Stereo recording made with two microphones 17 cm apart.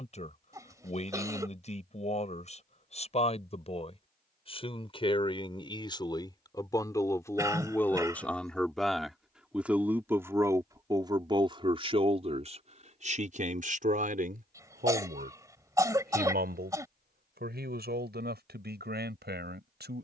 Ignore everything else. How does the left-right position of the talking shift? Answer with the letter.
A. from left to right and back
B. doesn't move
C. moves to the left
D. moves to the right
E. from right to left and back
D.